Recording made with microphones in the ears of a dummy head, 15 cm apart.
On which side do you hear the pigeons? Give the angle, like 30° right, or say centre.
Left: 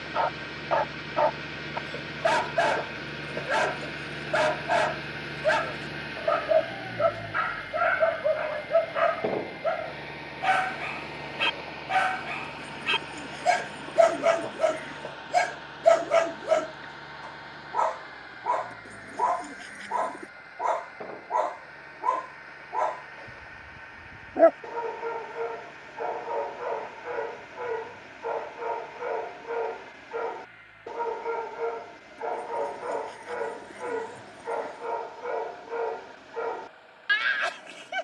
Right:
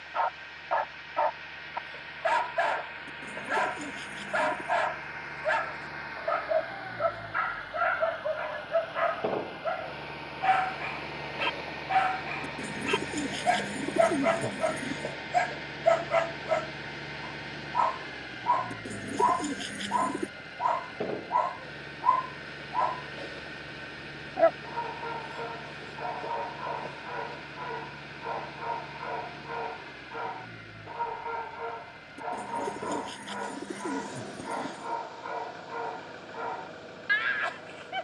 40° right.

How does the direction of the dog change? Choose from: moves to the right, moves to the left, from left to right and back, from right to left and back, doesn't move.
doesn't move.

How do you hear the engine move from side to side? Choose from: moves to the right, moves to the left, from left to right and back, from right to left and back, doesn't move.
moves to the right.